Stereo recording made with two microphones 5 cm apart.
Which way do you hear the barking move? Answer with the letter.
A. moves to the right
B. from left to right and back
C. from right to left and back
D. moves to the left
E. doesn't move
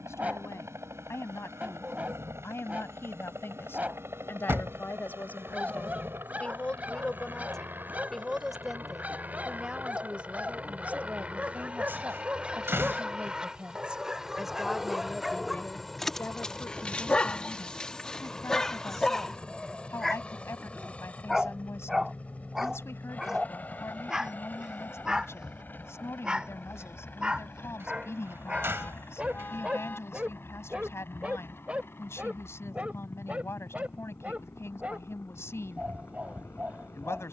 C.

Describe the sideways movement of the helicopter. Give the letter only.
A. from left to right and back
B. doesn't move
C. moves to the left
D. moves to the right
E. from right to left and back
C.